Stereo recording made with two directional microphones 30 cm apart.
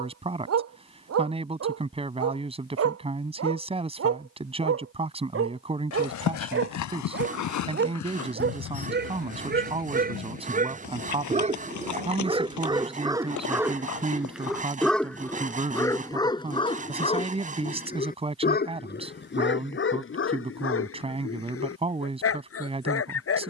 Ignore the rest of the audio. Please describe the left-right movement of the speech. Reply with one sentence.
In this clip you hear the speech stay put.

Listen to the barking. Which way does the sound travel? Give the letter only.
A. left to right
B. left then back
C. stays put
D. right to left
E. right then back
D.